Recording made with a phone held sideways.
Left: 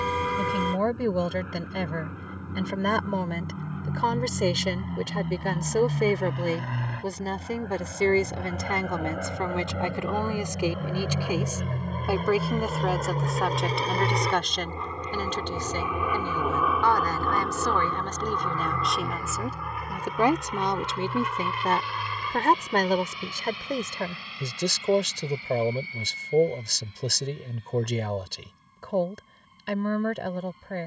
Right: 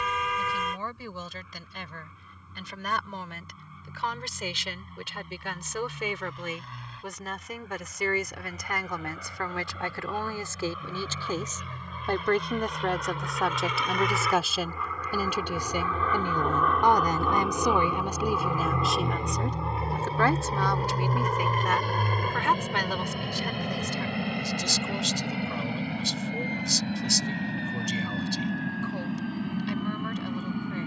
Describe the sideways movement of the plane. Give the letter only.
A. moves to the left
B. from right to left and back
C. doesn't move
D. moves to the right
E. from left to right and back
D.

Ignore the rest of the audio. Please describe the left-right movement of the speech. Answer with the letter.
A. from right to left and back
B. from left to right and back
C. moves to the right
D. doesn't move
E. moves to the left
B.